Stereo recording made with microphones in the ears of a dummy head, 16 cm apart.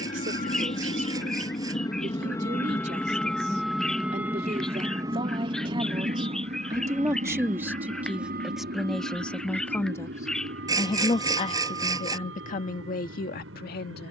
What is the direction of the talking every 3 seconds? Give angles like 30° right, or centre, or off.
50° right, 30° right, 10° right, 20° left, 50° left.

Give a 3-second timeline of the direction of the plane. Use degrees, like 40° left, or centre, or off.
30° left, 10° right, 40° right, 60° right, 70° right.